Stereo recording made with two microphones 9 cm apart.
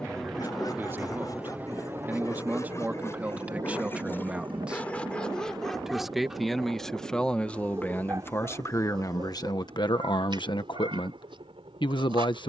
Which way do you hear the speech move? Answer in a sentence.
In this clip you hear the speech move to the left.